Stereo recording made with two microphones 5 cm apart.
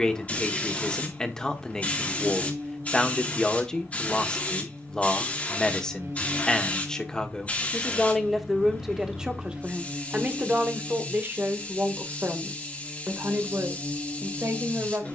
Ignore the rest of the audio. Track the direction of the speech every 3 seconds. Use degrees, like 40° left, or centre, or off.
10° left, 10° left, 10° left, 30° right, 60° right.